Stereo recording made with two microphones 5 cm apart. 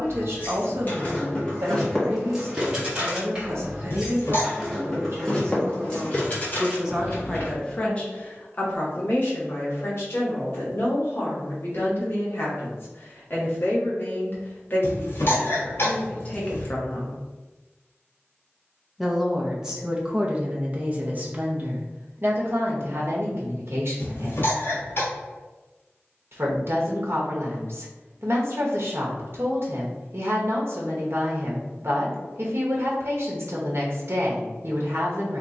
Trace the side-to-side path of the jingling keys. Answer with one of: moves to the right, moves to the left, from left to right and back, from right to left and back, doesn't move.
from left to right and back.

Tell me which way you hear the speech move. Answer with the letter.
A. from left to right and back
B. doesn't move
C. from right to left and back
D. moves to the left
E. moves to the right
C.